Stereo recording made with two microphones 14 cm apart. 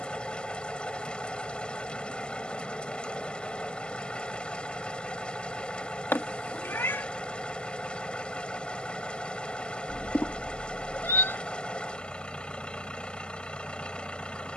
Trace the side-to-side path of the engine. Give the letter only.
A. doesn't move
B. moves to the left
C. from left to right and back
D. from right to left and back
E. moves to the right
A.